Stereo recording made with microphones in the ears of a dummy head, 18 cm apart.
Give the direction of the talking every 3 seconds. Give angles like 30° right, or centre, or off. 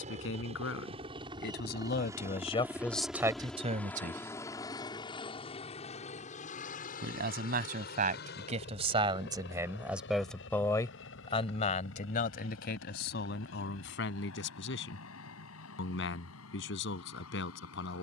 50° left, 30° right, 40° right, 10° left, 60° left, 70° left.